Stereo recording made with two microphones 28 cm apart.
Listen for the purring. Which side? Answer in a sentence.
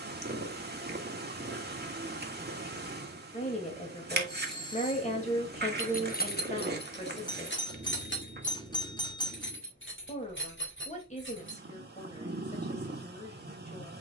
In this clip you hear the purring on the right.